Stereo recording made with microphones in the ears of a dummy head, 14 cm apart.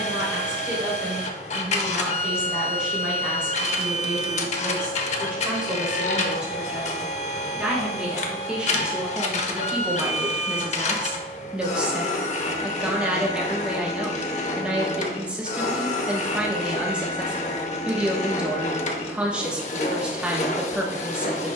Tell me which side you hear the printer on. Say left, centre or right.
left.